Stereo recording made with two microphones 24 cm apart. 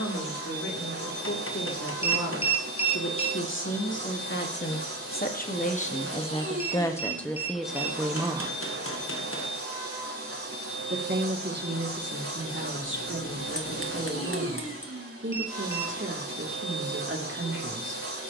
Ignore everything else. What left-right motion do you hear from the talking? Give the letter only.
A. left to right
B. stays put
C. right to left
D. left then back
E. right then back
A.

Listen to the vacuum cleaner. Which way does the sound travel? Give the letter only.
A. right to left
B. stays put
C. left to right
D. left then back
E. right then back
B.